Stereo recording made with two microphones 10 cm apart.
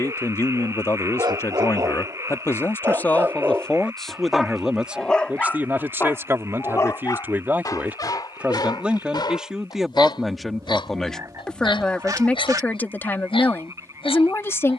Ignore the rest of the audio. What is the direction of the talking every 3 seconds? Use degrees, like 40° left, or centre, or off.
30° left, centre, 20° right, centre, 20° left.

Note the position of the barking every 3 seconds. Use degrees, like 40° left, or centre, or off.
40° right, centre, 40° left, 50° left, 60° left.